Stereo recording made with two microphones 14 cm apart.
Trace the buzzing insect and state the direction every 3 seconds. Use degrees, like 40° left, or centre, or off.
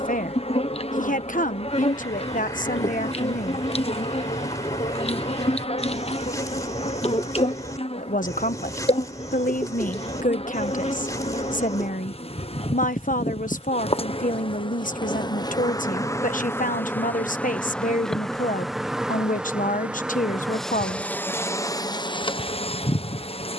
50° left, 50° left, 50° left, 50° left, 40° left, 20° left, centre, 30° left.